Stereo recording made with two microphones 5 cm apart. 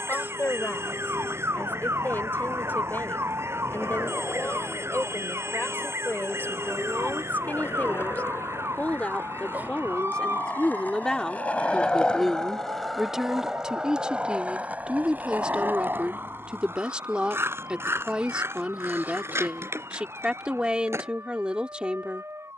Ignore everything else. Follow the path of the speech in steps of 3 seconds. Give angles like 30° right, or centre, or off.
50° left, 50° left, 40° left, 20° left, 10° right, 20° right, 20° right, 20° right.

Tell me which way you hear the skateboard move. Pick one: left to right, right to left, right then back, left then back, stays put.
left to right.